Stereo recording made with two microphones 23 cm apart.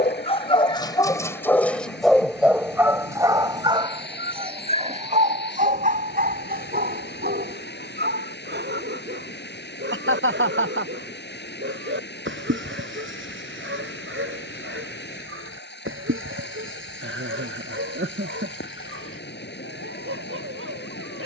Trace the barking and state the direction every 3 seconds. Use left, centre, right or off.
centre, right, right, right, right, right, right.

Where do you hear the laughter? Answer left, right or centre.
right.